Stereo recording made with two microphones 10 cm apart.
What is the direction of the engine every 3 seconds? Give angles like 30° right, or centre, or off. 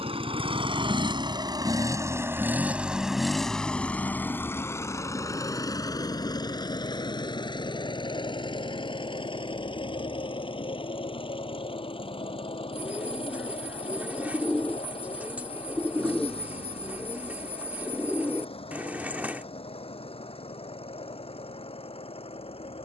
40° right, 20° left, 50° left, 50° left, 60° left, 60° left, 60° left, 60° left.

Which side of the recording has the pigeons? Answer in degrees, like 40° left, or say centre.
10° right.